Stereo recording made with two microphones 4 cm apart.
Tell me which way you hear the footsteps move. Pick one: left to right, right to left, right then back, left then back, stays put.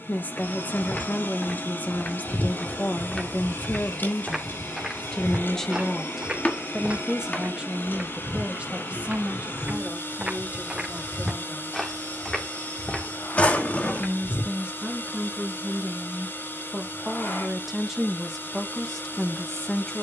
right then back.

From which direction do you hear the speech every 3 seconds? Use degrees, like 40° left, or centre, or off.
40° left, 30° left, 20° right, 40° right, 30° right, 20° right, 10° left.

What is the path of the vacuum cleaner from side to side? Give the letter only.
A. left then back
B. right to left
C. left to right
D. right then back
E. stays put
E.